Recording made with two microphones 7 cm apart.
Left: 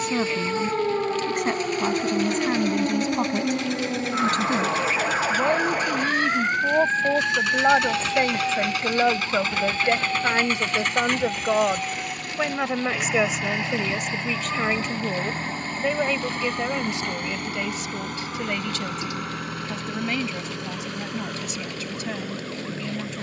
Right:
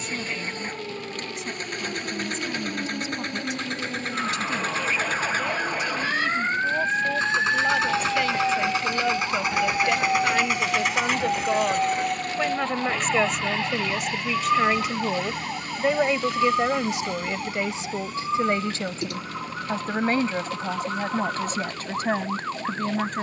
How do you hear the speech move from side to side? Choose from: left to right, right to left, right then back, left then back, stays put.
left to right.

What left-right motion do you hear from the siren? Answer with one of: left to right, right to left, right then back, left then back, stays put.
left to right.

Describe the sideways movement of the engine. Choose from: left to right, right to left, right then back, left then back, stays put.
right to left.